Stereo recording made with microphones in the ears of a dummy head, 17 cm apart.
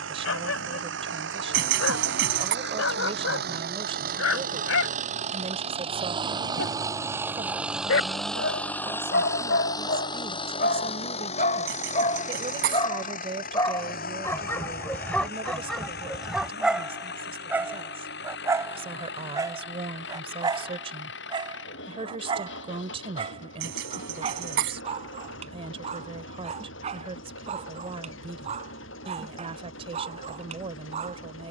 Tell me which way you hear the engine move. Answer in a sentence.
In this clip you hear the engine travel towards the left.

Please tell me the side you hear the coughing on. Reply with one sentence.
You can hear the coughing on the right.